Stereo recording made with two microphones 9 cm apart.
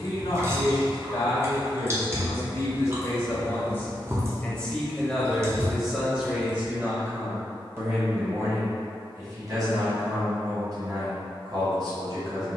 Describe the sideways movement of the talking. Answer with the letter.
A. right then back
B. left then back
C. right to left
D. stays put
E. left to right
E.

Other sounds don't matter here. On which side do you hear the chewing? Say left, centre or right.
right.